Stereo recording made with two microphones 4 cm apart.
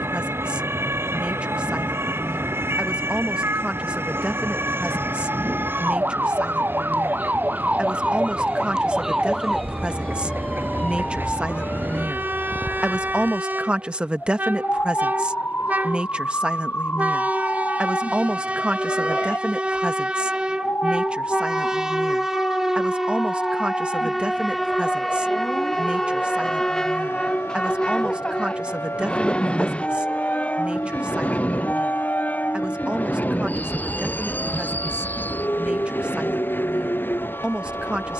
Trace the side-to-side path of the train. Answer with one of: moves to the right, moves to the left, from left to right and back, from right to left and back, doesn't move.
moves to the left.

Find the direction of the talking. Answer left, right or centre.
right.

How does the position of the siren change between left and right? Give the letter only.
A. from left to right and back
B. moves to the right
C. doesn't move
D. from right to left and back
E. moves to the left
E.